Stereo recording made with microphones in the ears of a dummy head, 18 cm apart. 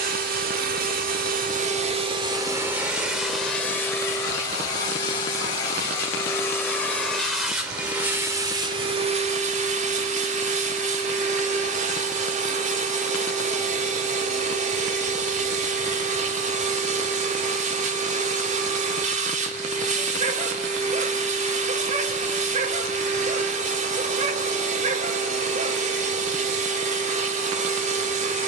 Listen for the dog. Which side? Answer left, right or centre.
right.